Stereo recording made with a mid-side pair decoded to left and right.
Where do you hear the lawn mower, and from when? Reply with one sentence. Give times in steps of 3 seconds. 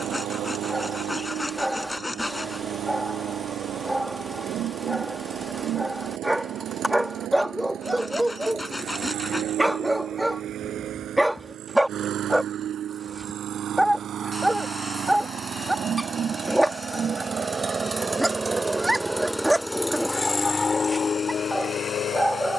In this clip you hear the lawn mower on the right from 0 s, in the centre from 18 s and on the left from 21 s.